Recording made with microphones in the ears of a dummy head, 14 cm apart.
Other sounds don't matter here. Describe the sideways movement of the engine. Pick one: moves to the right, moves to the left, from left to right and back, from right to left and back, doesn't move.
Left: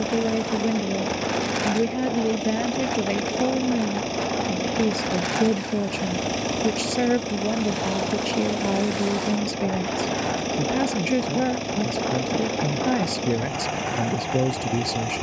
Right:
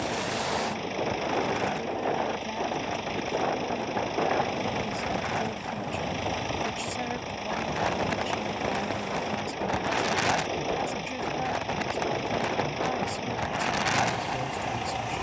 doesn't move.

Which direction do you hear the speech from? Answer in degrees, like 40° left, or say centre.
70° left.